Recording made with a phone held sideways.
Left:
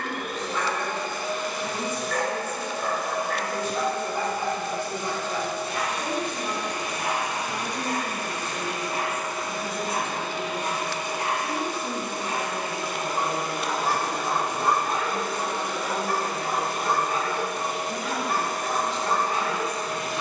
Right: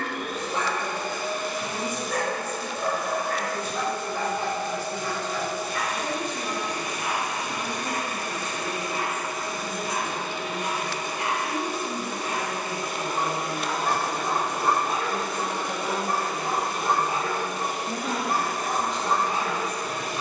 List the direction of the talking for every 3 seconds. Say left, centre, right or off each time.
left, left, left, left, centre, right, right.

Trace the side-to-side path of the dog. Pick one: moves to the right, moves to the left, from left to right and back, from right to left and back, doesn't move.
from right to left and back.